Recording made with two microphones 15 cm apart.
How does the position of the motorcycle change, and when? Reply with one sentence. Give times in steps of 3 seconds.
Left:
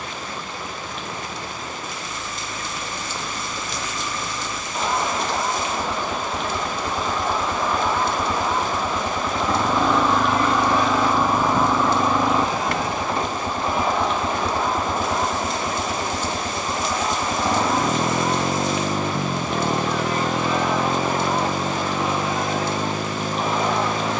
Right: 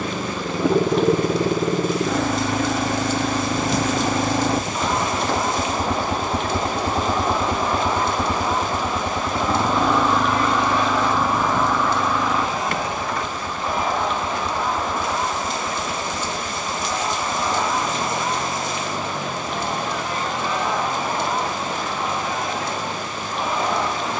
You can hear the motorcycle on the right from 0 s, in the centre from 9 s and on the left from 12 s.